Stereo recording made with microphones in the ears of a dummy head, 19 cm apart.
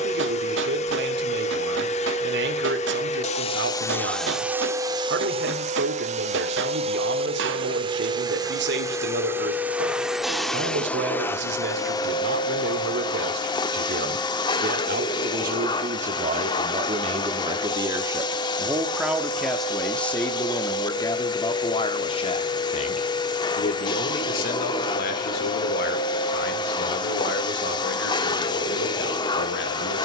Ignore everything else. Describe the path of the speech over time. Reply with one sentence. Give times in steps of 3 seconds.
You can hear the speech on the right from 0 s, in the centre from 18 s and on the left from 21 s.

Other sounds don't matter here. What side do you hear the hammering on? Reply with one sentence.
In this clip you hear the hammering on the right.